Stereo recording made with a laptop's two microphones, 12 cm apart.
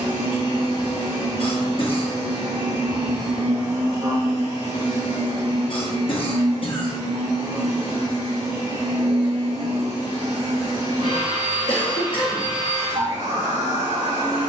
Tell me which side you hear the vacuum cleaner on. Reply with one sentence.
You can hear the vacuum cleaner on the right.